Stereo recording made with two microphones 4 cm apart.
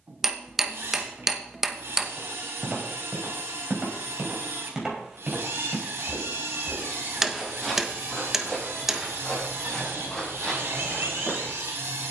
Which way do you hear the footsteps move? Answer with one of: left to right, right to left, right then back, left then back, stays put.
right to left.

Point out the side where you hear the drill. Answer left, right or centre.
right.